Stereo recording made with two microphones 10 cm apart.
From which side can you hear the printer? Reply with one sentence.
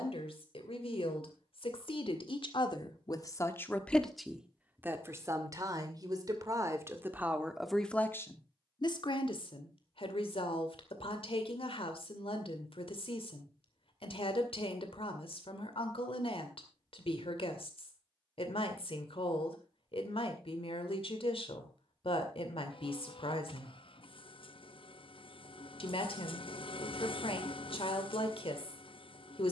In this clip you hear the printer on the left.